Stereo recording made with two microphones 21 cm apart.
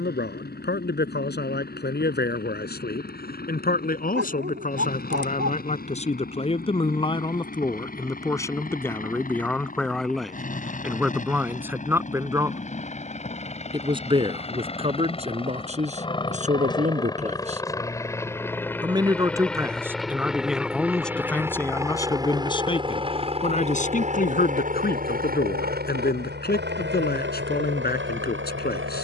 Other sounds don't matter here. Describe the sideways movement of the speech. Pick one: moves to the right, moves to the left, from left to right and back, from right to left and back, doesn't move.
from left to right and back.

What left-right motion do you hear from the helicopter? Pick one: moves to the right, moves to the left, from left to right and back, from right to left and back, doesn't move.
moves to the right.